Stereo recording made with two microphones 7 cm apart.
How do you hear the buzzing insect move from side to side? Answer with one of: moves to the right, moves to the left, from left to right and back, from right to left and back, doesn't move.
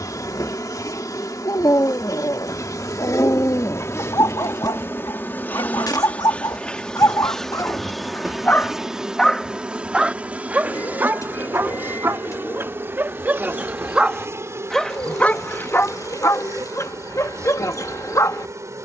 moves to the right.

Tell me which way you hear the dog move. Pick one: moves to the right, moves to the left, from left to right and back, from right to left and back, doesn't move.
from left to right and back.